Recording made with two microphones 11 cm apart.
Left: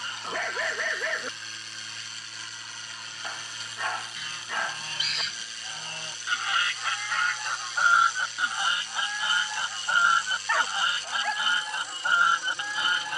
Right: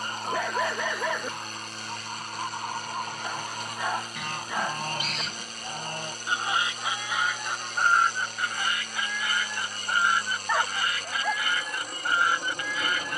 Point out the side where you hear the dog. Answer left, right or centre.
centre.